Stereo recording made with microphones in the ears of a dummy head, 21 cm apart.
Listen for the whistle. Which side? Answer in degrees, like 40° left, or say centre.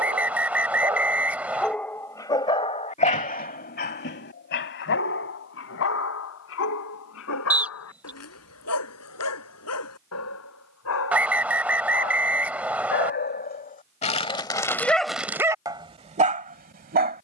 10° right.